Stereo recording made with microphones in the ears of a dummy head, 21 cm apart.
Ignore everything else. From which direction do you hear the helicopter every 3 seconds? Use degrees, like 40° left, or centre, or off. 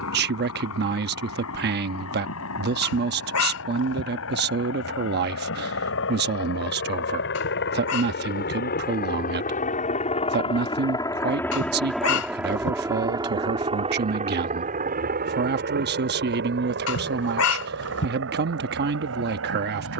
80° left, 70° left, 60° left, 20° left, 20° right, 50° right, 60° right.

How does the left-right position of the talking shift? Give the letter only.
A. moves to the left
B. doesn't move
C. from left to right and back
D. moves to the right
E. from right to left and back
B.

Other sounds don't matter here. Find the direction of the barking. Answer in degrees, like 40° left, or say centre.
70° left.